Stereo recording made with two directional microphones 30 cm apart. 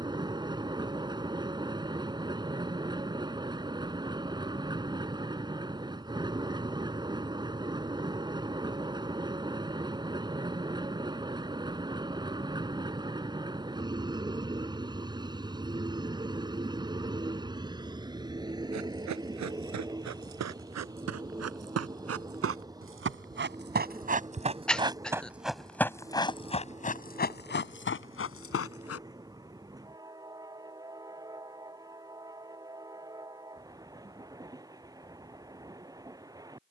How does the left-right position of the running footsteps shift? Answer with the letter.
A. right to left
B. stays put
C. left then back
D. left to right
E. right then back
A.